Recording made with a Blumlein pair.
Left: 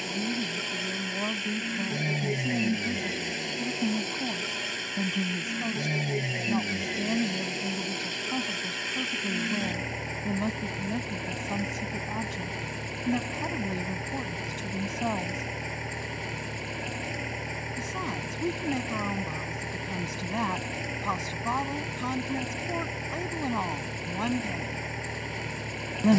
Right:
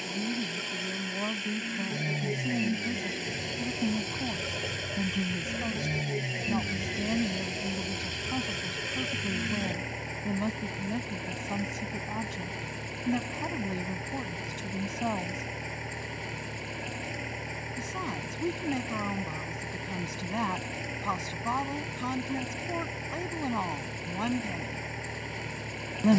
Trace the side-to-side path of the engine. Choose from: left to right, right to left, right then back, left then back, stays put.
stays put.